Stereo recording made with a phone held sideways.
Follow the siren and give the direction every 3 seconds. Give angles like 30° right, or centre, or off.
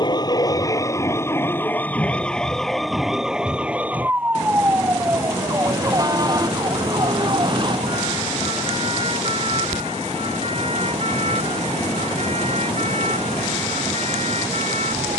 20° left, 20° right, 40° right, 50° right, 50° right.